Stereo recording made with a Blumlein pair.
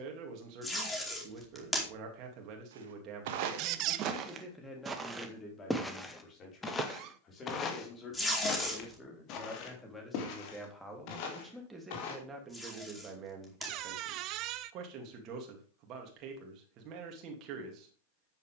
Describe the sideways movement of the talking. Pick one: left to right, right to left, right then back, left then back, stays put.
left then back.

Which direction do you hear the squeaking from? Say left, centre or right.
right.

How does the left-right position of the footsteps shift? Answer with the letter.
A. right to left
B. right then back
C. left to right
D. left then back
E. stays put
A.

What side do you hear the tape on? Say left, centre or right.
centre.